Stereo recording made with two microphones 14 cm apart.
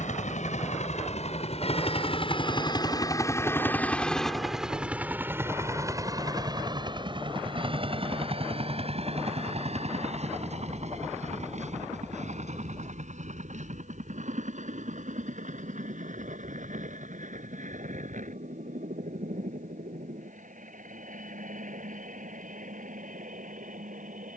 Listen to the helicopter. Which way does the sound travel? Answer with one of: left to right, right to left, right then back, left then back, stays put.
left to right.